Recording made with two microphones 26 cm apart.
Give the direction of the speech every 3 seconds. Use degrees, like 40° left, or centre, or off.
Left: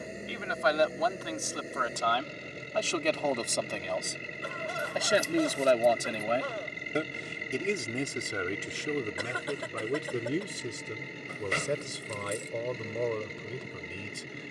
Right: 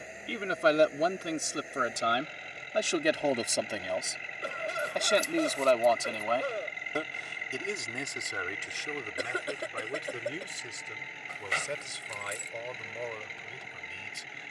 30° right, centre, 30° left, 50° left, 60° left.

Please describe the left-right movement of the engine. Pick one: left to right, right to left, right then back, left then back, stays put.
stays put.